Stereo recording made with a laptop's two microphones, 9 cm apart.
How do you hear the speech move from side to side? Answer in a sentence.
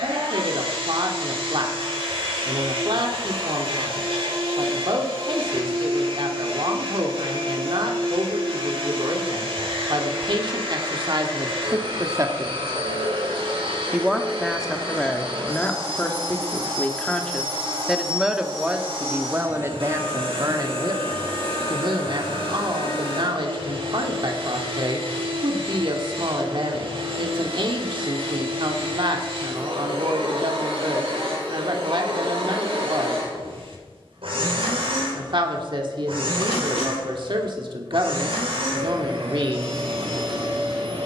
You can hear the speech move from right to left and back again.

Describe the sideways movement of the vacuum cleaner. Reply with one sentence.
In this clip you hear the vacuum cleaner stay put.